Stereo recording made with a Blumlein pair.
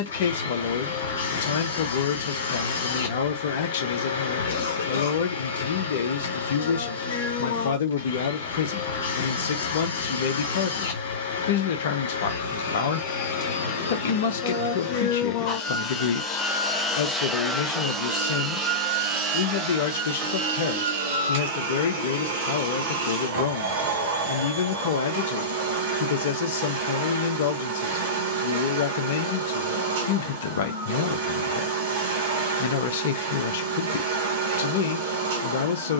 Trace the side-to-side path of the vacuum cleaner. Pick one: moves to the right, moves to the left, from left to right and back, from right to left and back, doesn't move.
moves to the right.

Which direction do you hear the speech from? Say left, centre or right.
left.